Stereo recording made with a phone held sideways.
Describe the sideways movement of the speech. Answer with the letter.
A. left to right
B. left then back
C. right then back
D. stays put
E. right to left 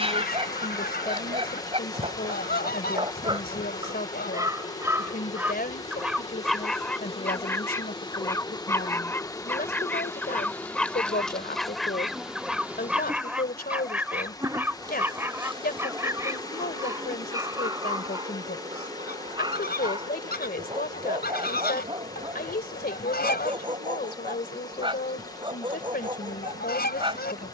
D.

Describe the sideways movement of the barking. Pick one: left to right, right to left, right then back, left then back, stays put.
left then back.